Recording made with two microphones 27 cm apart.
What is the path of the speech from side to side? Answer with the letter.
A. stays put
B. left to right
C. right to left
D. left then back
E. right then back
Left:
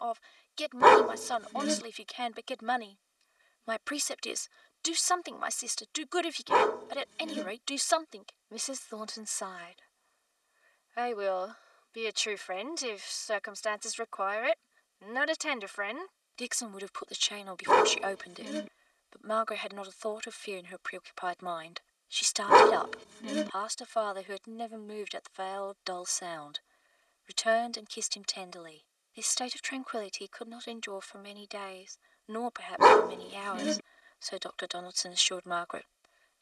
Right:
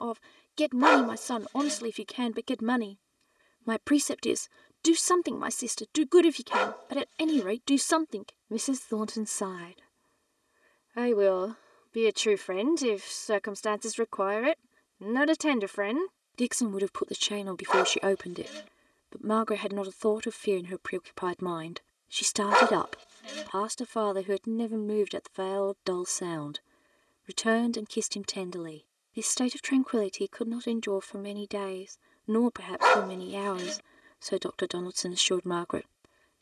A.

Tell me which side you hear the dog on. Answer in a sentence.
You can hear the dog on the left.